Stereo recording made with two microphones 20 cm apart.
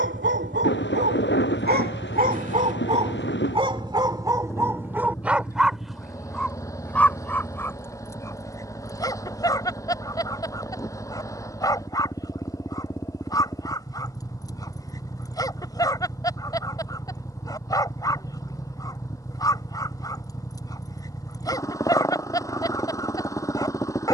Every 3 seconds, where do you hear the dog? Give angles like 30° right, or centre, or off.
50° right, 20° right, 10° left, 20° left, 20° left, 20° left, 20° left, 20° left.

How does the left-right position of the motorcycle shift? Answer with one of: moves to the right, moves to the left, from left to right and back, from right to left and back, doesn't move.
doesn't move.